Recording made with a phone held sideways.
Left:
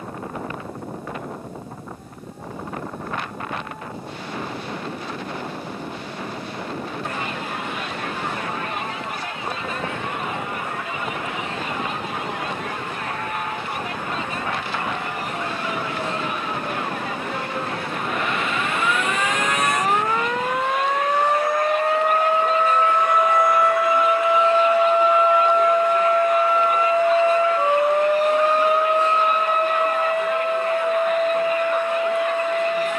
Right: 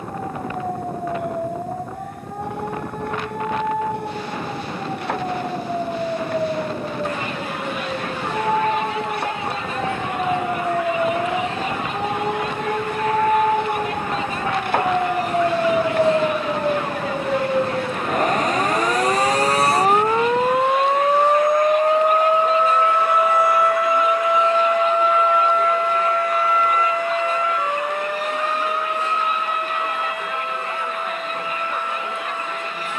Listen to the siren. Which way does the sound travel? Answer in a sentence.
You can hear the siren move to the left.